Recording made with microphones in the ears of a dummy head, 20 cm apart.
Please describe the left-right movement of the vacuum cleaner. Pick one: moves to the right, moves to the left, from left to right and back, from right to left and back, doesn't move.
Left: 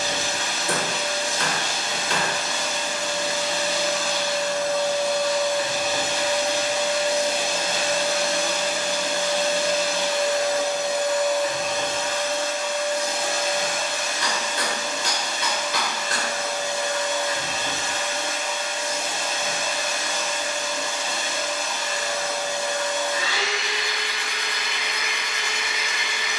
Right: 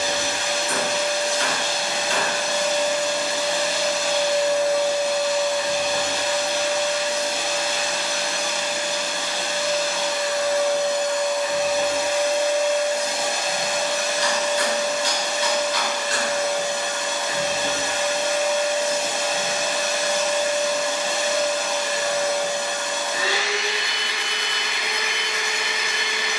from right to left and back.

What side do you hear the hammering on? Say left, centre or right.
left.